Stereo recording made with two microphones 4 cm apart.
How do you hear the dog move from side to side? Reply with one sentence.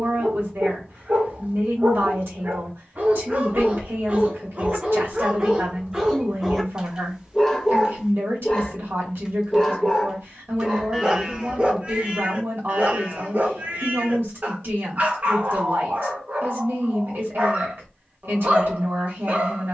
You can hear the dog go left and come back.